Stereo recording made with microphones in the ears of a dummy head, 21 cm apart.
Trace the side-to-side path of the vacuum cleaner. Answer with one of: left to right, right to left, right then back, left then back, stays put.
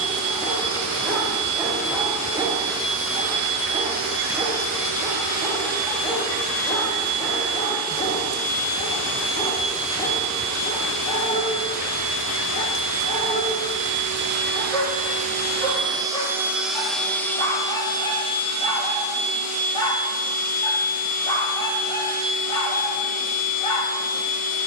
right to left.